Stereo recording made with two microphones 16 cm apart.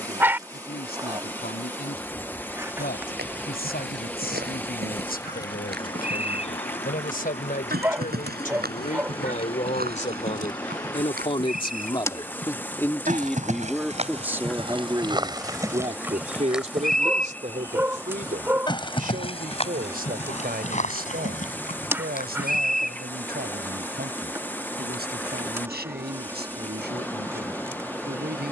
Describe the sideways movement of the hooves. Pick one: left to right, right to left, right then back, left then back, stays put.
right to left.